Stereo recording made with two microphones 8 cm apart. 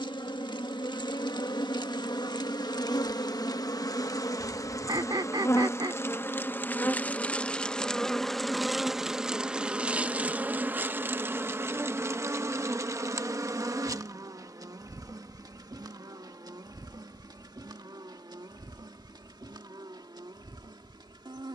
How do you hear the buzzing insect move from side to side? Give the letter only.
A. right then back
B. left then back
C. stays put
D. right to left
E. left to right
E.